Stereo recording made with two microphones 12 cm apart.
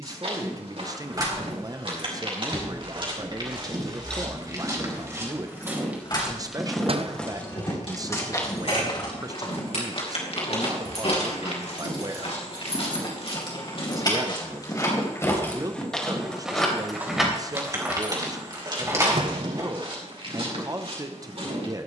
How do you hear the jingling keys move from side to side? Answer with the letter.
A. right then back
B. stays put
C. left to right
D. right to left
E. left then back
E.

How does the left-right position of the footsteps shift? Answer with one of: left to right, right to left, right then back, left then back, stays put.
left then back.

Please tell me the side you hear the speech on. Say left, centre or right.
right.